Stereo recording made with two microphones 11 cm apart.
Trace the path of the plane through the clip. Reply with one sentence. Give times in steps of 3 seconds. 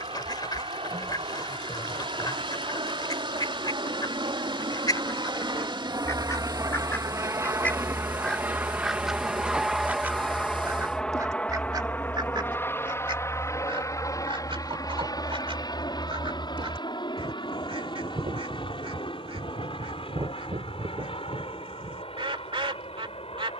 You can hear the plane on the right from 0 s, in the centre from 9 s and on the left from 12 s.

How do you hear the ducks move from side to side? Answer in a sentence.
In this clip you hear the ducks go from the left side to the right.